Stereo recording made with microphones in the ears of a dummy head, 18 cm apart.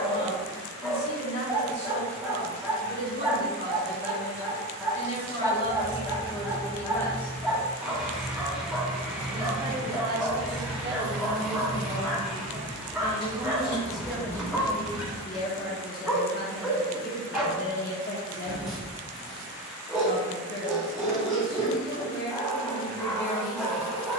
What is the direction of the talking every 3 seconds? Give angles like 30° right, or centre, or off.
50° left, 40° left, 10° left, 20° right, 10° right, 40° left, 50° left, 50° left.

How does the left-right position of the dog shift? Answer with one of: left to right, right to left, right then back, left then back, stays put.
stays put.